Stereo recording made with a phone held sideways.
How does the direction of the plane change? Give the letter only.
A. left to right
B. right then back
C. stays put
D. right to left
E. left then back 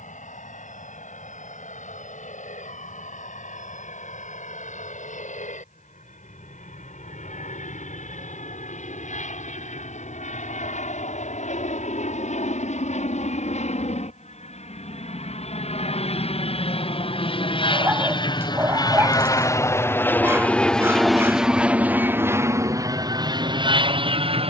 A.